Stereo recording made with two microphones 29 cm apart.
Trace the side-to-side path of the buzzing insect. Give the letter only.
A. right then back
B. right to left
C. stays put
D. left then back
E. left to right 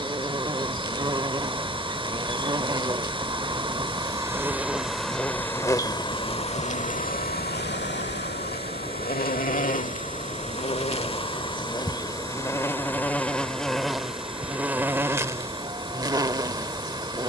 D.